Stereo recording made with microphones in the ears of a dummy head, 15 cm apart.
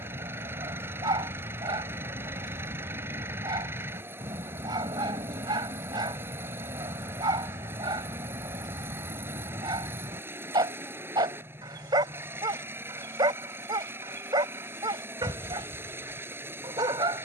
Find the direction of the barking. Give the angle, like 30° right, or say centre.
20° right.